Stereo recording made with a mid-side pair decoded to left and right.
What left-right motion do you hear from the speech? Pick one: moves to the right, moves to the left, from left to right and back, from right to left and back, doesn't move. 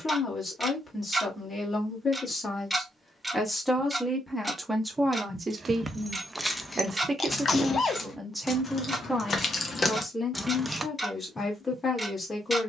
from left to right and back.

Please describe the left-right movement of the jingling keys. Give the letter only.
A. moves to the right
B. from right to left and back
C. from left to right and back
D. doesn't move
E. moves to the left
B.